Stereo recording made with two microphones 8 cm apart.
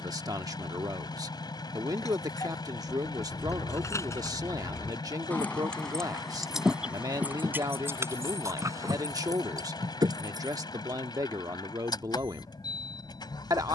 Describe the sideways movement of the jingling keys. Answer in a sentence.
In this clip you hear the jingling keys move from left to right.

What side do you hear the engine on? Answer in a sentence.
In this clip you hear the engine on the left.